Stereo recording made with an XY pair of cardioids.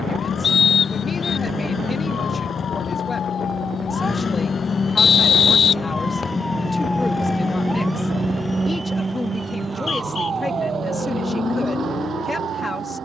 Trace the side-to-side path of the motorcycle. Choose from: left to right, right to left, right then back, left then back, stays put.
stays put.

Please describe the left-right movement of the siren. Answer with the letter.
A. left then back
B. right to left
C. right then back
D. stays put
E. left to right
E.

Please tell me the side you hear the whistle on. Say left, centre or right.
left.